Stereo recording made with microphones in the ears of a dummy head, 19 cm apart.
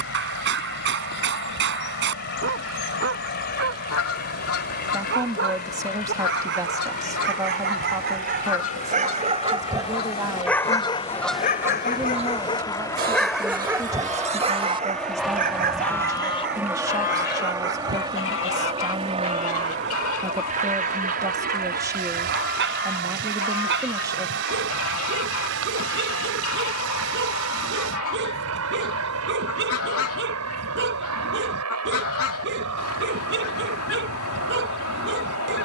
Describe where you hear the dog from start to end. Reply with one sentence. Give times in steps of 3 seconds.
You can hear the dog on the right from 0 s, in the centre from 9 s and on the right from 15 s.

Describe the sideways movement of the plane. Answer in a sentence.
You can hear the plane go from the left side to the right.